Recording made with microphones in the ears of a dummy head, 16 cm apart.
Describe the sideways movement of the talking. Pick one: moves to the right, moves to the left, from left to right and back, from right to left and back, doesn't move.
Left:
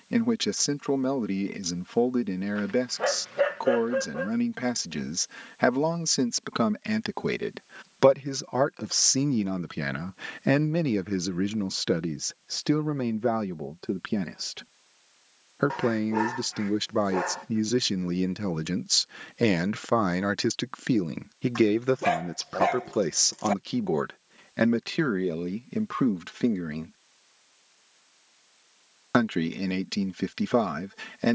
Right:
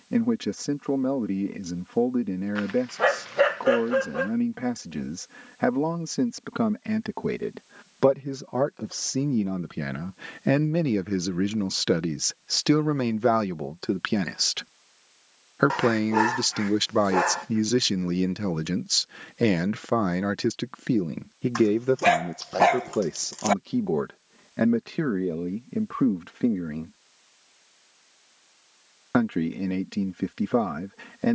from left to right and back.